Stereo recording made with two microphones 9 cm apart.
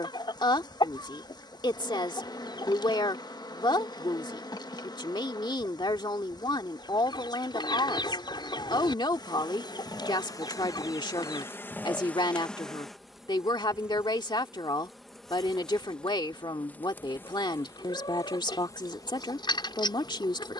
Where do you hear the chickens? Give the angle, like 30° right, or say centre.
60° left.